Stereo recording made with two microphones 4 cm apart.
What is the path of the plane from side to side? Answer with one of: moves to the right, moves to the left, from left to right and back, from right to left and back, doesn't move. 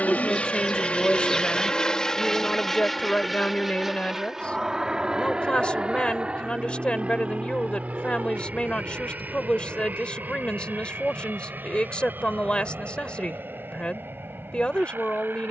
moves to the right.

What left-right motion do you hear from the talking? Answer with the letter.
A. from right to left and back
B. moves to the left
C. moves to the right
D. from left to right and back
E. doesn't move
E.